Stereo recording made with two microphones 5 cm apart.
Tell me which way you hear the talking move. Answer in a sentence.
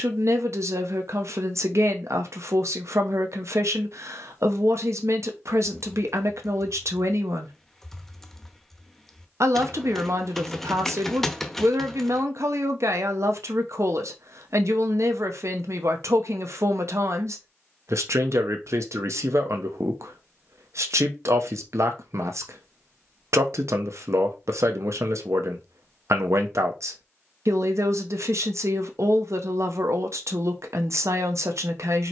You can hear the talking stay put.